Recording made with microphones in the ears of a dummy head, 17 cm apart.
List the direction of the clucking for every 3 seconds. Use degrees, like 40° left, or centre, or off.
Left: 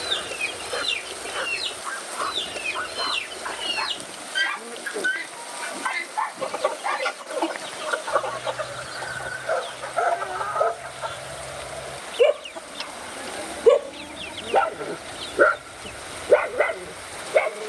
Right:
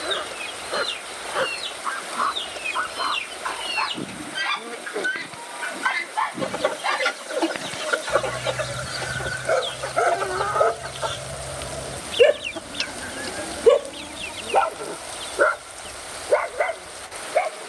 30° left, 10° left, 20° right, 50° right, 20° right, 30° left.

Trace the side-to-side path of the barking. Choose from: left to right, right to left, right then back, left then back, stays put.
right to left.